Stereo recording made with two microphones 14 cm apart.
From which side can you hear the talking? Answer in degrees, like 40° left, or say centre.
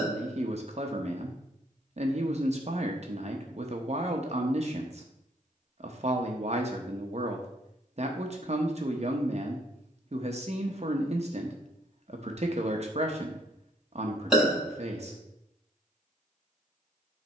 50° right.